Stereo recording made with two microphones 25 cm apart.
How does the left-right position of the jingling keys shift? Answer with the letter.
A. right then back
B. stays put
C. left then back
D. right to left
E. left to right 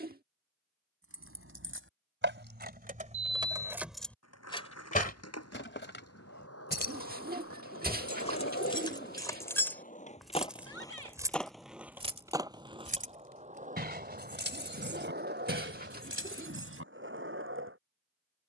C.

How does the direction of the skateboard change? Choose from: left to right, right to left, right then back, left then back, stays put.
left to right.